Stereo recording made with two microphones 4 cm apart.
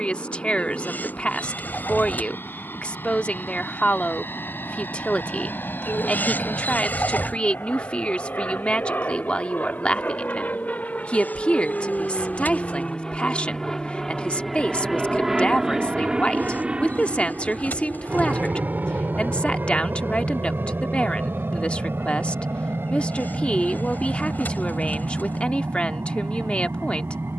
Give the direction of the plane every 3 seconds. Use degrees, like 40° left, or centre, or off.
70° left, 70° left, 60° left, 40° left, 20° left, 20° right, 50° right, 60° right, 70° right.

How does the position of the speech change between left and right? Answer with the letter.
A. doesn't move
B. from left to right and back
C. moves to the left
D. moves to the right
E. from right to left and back
A.